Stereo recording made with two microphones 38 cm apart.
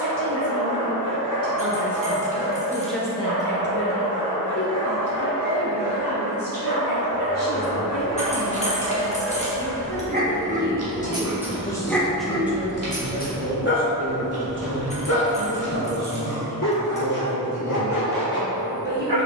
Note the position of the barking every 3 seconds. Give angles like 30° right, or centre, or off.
70° right, 60° right, 50° right, 20° right, 20° left, 60° left, 70° left.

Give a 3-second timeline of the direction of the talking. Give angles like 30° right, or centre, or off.
30° right, 40° left, 60° left, 30° left, 20° right, 50° right, 50° right.